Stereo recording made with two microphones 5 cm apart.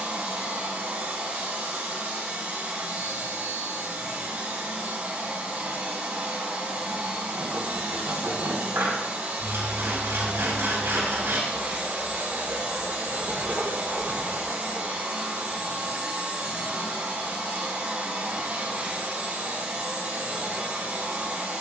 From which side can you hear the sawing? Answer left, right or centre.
right.